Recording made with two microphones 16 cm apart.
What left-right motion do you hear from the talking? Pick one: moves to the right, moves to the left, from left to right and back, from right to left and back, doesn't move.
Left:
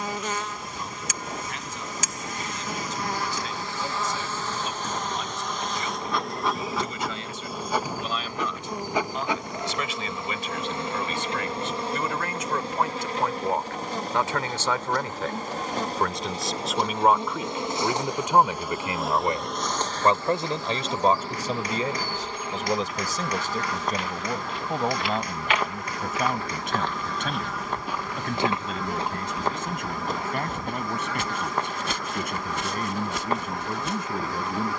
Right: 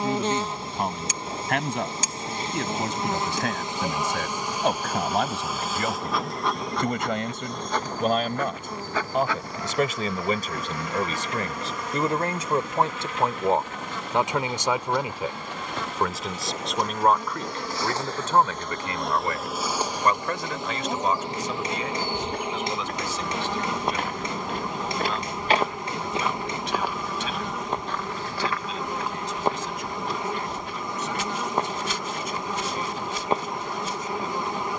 moves to the left.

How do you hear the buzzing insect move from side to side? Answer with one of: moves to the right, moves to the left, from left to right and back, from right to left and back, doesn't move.
from right to left and back.